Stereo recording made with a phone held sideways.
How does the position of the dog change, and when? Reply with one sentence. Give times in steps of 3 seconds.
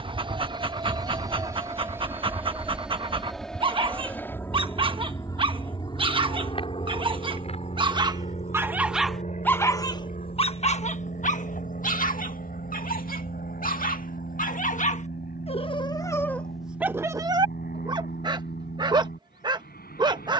In this clip you hear the dog on the right from 0 s, on the left from 9 s, in the centre from 15 s and on the right from 18 s.